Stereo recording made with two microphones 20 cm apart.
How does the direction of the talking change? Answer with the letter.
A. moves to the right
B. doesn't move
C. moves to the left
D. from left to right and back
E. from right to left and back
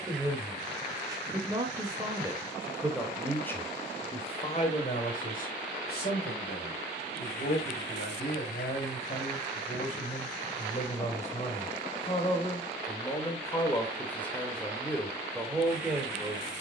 E.